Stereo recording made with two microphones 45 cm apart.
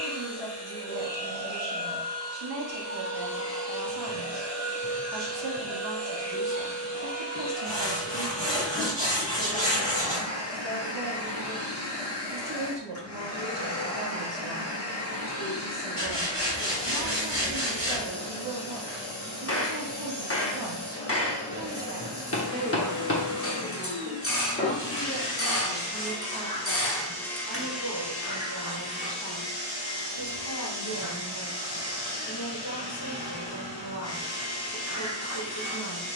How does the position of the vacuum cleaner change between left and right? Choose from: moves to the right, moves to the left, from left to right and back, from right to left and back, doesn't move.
moves to the right.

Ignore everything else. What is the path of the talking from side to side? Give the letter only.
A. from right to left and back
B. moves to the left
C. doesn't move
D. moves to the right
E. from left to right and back
B.